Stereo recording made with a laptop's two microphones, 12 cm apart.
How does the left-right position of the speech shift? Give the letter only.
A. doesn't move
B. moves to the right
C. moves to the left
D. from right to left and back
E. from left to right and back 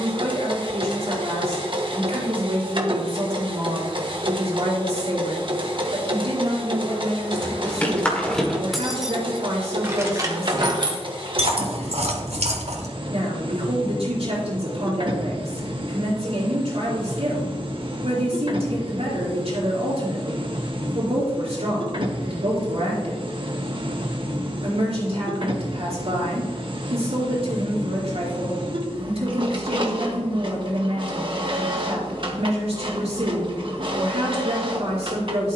A.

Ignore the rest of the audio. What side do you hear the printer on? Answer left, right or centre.
right.